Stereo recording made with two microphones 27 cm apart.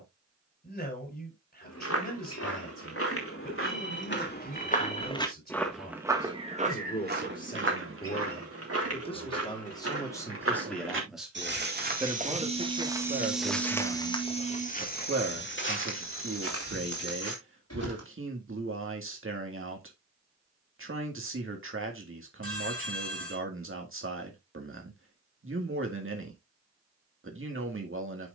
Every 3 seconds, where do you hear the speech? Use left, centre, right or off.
left, left, left, centre, right, right, right, right, right, right.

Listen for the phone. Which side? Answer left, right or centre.
right.